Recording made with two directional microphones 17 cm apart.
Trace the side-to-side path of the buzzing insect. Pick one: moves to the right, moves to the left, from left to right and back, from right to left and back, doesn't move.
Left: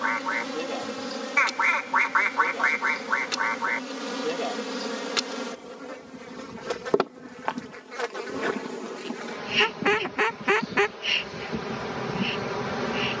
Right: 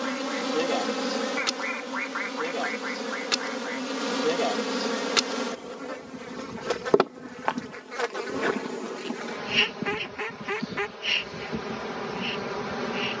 moves to the left.